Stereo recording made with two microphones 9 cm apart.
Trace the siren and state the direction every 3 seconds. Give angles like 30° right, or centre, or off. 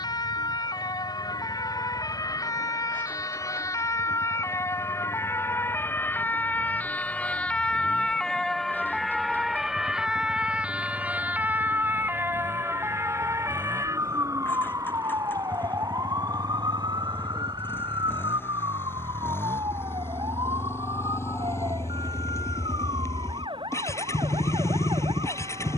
50° left, 30° left, 10° left, 10° right, 30° right, 50° right, 60° right, 60° right, 70° right.